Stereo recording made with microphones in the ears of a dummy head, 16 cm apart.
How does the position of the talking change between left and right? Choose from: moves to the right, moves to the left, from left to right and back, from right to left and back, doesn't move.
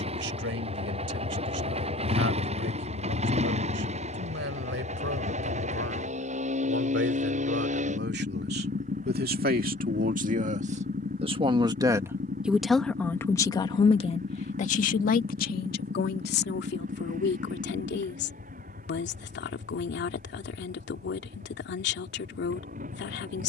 moves to the left.